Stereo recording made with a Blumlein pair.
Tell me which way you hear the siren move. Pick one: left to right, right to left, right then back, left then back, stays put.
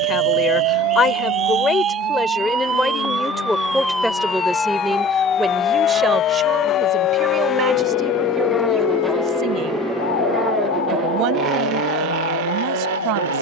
right to left.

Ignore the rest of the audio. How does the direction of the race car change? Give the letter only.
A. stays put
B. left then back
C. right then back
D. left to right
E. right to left
D.